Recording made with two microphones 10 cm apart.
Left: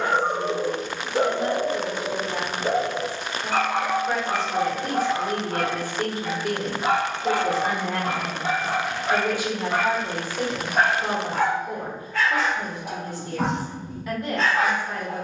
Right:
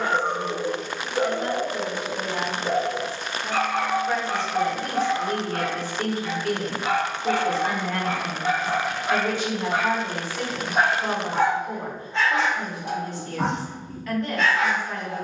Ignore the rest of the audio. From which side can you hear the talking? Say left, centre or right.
centre.